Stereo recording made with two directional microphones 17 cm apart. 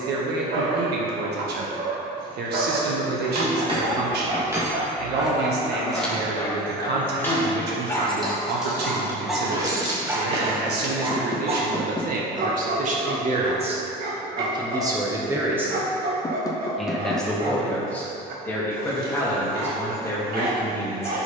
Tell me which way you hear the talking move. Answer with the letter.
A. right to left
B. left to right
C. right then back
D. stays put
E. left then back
A.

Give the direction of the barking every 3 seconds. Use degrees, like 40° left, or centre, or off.
70° right, 30° right, 10° left, 20° right, 60° right, 60° right, 60° right.